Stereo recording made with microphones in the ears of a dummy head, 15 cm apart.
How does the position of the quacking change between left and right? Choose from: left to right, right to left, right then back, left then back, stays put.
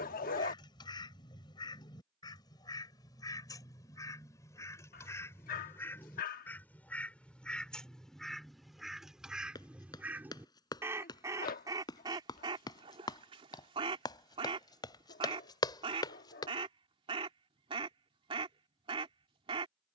left to right.